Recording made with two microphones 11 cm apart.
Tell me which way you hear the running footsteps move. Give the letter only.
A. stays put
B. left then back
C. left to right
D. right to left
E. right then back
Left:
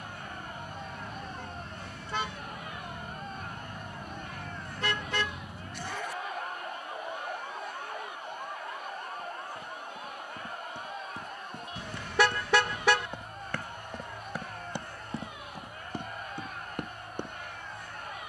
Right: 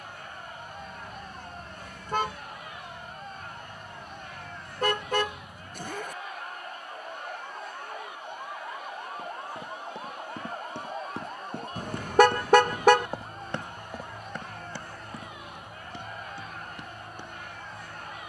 D.